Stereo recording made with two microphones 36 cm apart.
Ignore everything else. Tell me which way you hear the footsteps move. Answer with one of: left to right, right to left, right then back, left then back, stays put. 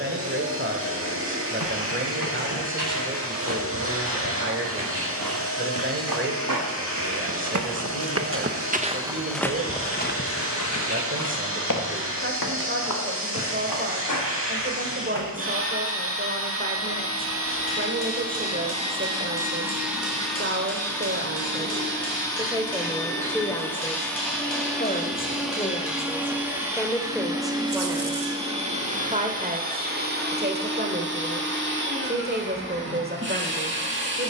right to left.